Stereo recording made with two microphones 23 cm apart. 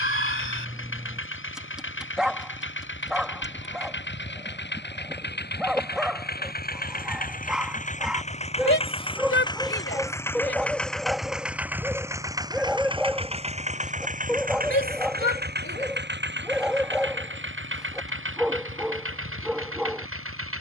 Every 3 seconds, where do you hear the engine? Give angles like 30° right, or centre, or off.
60° left, 50° left, 40° left, 10° left, 30° right, 50° right, 60° right.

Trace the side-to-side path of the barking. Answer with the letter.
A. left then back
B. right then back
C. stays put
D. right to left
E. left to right
C.